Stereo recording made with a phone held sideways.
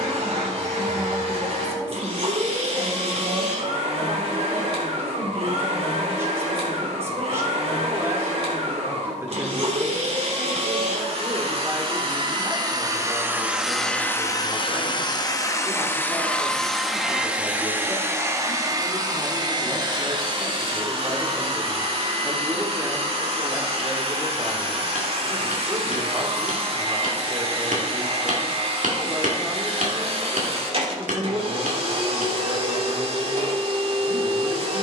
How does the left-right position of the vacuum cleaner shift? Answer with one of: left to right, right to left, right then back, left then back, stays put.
left then back.